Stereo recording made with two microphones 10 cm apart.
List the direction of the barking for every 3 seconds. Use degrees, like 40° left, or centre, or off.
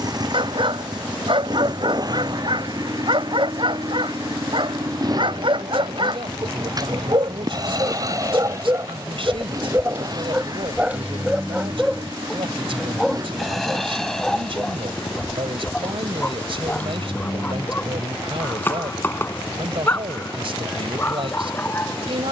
60° right, 60° right, 40° right, 20° right, centre, 10° left, 20° left, 20° left.